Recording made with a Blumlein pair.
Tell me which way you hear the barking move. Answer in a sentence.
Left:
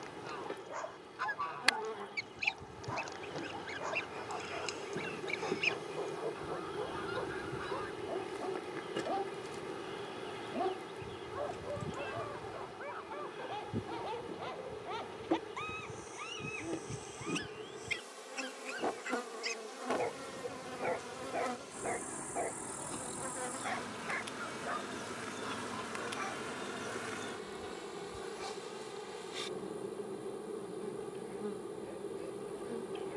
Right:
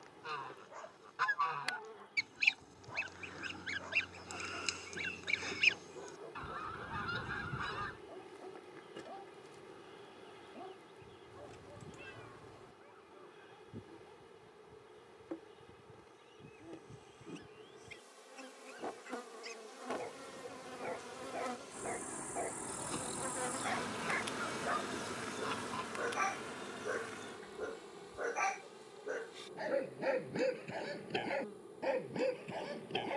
In this clip you hear the barking move from left to right.